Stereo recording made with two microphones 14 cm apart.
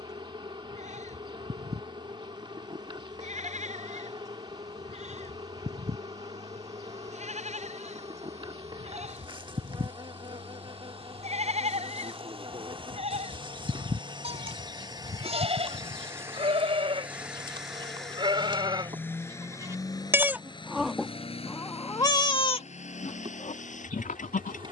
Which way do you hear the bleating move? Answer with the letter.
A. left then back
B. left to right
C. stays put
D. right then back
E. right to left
E.